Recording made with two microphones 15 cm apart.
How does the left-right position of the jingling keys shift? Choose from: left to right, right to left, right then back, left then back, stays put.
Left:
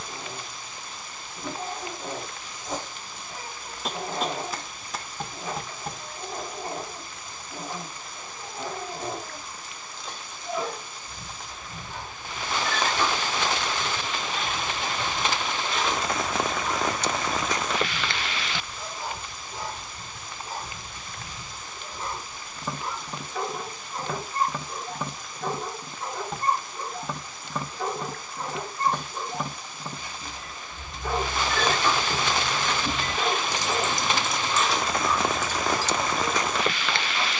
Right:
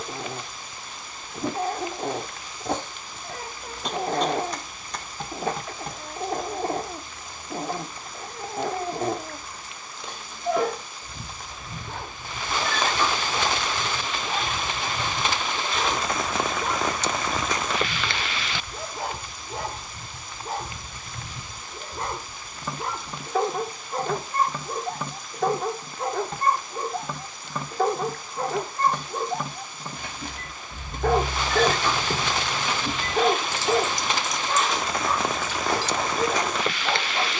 right to left.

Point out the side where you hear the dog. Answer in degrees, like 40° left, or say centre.
70° right.